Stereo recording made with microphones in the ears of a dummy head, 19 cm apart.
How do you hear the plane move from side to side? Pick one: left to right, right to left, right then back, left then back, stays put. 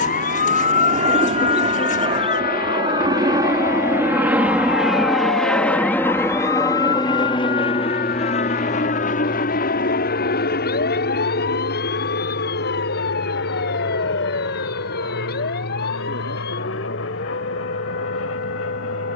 right to left.